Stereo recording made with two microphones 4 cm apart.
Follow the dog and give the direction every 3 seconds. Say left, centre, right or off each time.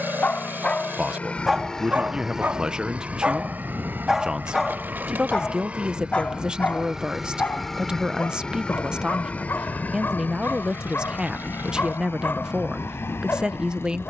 centre, centre, left, left, left.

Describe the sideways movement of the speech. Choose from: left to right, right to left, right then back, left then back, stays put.
stays put.